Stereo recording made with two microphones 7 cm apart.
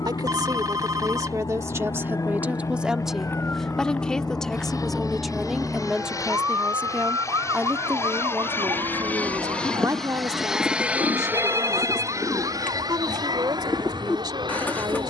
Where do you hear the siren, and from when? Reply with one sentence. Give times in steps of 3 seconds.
In this clip you hear the siren on the left from 0 s, in the centre from 3 s and on the right from 6 s.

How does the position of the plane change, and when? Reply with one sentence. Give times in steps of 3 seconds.
You can hear the plane on the left from 0 s, in the centre from 9 s and on the right from 12 s.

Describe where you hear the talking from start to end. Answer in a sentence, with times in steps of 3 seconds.
You can hear the talking on the right from 0 s, in the centre from 3 s and on the right from 6 s.